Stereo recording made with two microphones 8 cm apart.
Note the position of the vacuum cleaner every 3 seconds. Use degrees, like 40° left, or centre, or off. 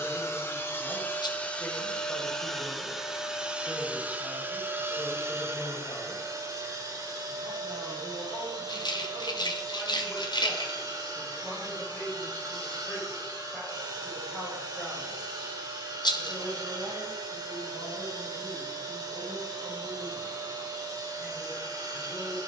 20° left, 20° right, 50° right, 60° right, 60° right, 60° right, 60° right, 60° right.